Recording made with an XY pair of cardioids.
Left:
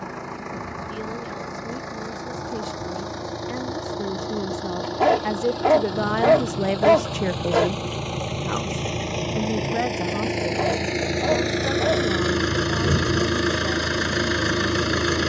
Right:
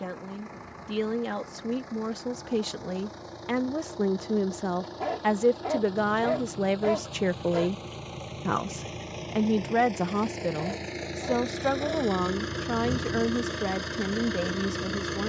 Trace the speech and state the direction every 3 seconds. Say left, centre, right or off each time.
right, right, centre, right, right.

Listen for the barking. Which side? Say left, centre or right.
left.